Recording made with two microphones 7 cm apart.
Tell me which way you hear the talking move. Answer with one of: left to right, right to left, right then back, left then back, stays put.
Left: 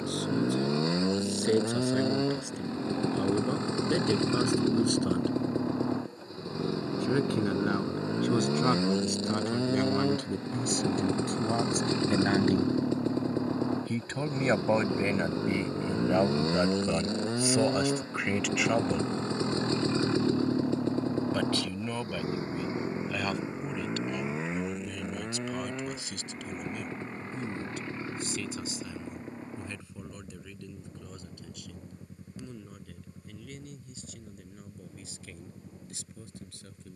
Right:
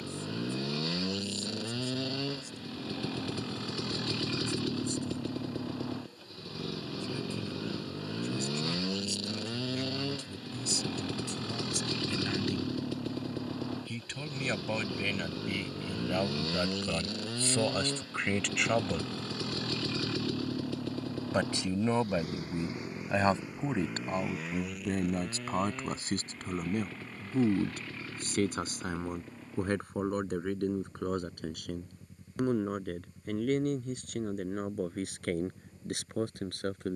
left to right.